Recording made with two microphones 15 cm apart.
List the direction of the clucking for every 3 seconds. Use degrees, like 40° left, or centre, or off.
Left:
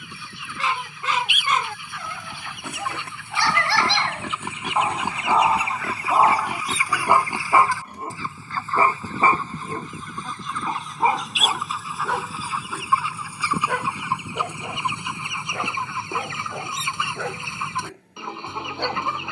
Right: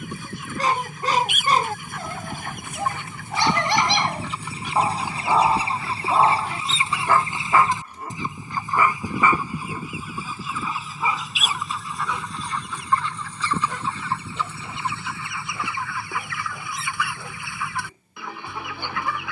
40° right, 30° right, 20° right, 10° right, 10° left, 20° left, 20° left.